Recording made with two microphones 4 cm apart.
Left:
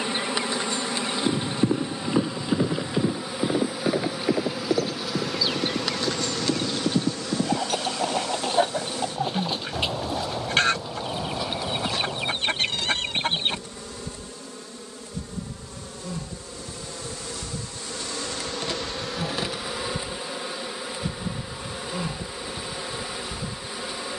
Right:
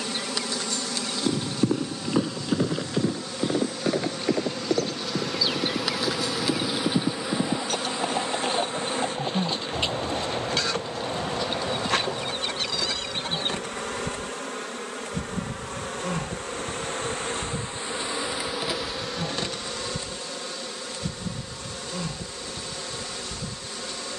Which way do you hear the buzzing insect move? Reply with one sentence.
In this clip you hear the buzzing insect move from left to right and back again.